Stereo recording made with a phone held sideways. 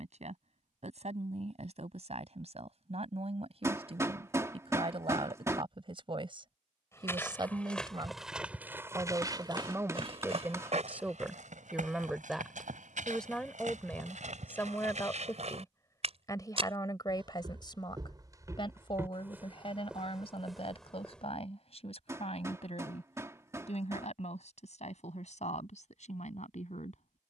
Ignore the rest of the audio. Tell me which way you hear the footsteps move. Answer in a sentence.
In this clip you hear the footsteps move from left to right and back again.